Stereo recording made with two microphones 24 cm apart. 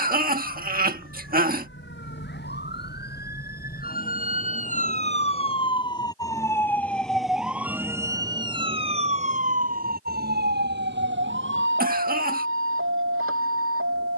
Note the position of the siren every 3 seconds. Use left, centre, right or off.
left, left, centre, right, right.